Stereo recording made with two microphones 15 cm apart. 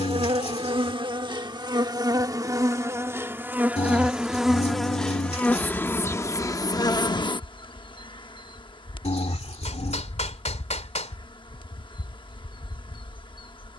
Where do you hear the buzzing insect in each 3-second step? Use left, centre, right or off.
right, centre, left, left, left.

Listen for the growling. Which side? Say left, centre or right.
left.